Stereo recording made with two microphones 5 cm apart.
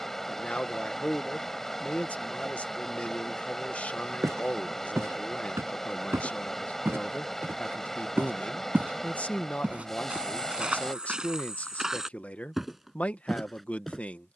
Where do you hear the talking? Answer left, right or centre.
left.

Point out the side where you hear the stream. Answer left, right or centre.
centre.